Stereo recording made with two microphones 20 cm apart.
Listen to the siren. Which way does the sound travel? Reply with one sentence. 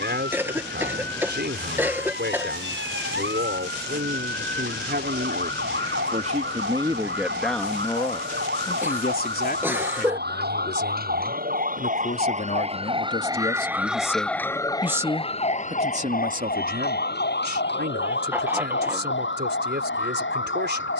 You can hear the siren travel towards the left.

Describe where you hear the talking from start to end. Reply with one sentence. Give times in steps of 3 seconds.
In this clip you hear the talking on the right from 0 s, in the centre from 6 s, on the left from 9 s and on the right from 15 s.